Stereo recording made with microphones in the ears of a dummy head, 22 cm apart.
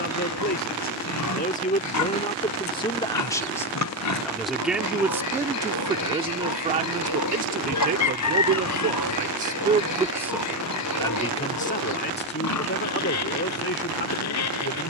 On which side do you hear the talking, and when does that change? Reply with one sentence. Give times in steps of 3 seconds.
You can hear the talking on the left from 0 s, in the centre from 3 s, on the right from 6 s, in the centre from 9 s and on the left from 12 s.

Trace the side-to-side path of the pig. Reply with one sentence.
In this clip you hear the pig stay in one place.